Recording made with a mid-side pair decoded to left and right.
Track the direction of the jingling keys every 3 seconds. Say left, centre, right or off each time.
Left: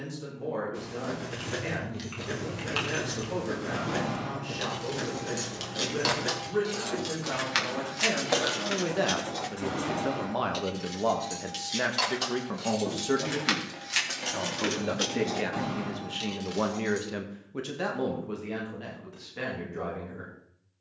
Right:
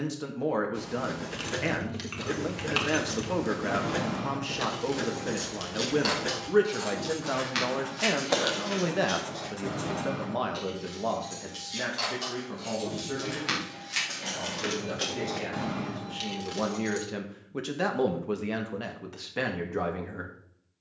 right, centre, left, left, left, centre, off.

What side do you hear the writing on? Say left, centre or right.
centre.